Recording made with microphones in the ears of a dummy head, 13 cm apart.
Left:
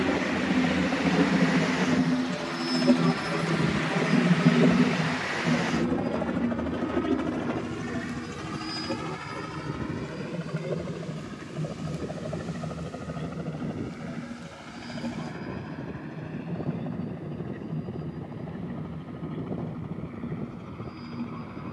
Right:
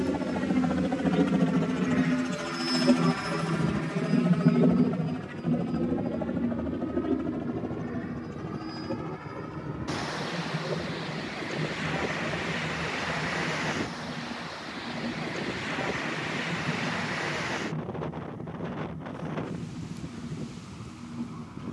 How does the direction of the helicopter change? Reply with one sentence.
In this clip you hear the helicopter move from right to left.